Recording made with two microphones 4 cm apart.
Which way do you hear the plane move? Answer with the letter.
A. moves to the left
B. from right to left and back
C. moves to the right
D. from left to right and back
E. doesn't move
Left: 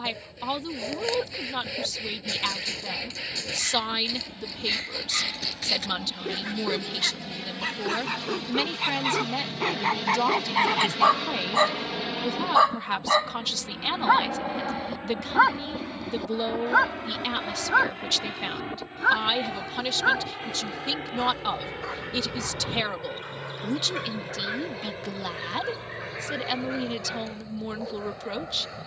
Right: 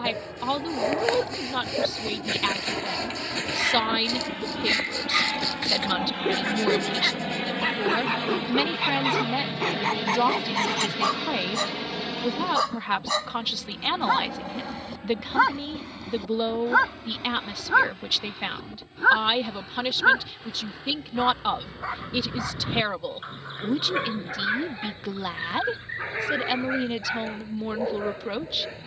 A.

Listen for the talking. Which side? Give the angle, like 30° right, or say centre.
10° right.